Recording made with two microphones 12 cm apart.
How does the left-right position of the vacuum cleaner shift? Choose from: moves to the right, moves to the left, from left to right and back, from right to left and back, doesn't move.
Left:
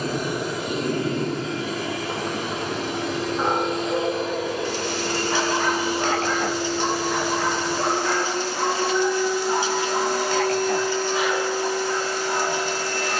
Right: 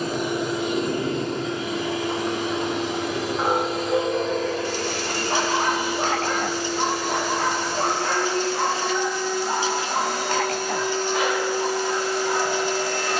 from right to left and back.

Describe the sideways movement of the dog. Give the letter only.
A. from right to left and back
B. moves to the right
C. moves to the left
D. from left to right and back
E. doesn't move
B.